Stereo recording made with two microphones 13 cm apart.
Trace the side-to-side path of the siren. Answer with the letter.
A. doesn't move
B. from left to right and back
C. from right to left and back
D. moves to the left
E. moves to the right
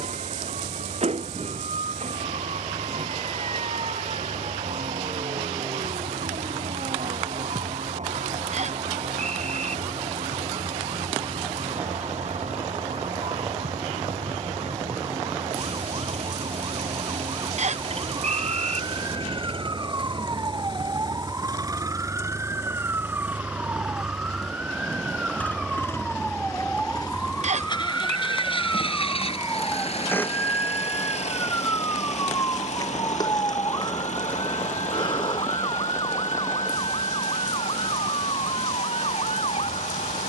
D.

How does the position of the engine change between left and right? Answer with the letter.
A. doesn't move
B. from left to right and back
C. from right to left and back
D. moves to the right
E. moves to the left
E.